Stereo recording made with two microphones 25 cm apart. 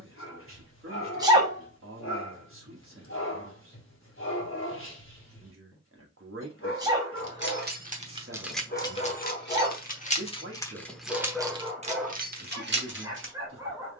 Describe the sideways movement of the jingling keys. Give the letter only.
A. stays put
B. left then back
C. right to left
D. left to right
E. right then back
B.